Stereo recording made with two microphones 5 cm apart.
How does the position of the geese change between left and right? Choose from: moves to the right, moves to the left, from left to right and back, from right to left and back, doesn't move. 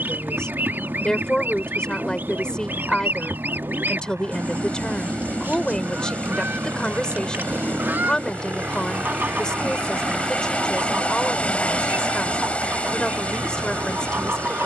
doesn't move.